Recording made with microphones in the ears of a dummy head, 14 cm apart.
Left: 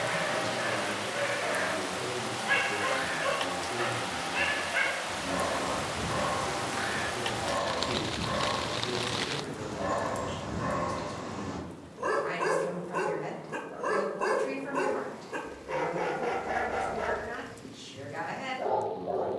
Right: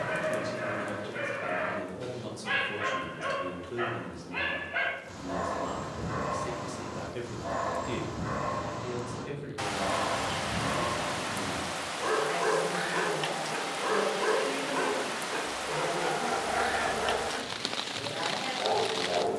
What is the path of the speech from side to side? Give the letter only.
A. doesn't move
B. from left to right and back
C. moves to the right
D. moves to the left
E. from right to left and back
B.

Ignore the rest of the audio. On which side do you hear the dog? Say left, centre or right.
centre.